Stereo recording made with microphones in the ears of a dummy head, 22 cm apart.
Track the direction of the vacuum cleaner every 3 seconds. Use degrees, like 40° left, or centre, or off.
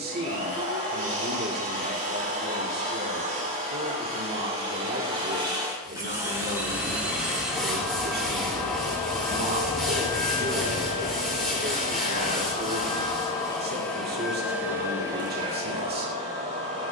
30° right, 20° right, centre, 20° left, 10° left, 30° right.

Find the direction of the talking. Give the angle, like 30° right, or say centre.
40° right.